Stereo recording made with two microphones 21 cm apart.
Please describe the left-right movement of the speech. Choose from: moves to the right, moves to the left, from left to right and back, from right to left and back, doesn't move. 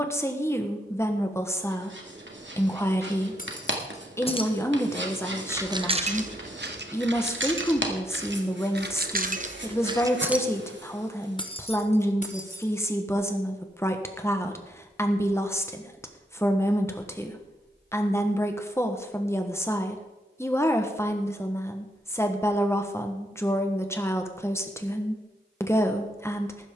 doesn't move.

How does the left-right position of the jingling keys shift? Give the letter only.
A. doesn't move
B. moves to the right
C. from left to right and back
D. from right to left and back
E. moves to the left
C.